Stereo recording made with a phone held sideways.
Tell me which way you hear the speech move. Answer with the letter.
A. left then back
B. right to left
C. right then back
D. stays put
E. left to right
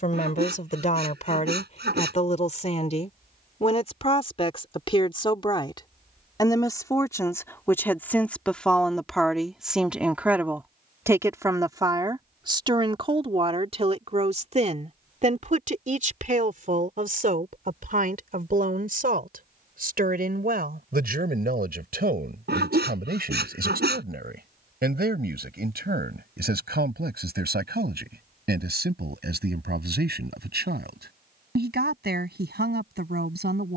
E.